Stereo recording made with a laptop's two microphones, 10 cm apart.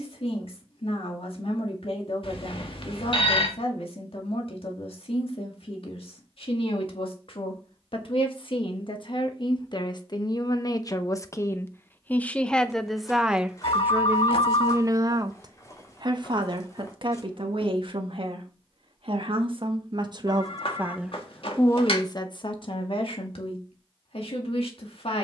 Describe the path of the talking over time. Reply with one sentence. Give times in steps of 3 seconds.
In this clip you hear the talking on the left from 0 s, in the centre from 12 s, on the right from 15 s and on the left from 21 s.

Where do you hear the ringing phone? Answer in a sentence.
You can hear the ringing phone on the left.